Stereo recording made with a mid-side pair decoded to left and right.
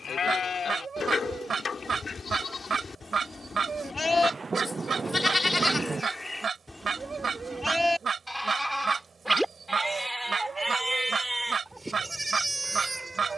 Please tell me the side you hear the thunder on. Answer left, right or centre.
right.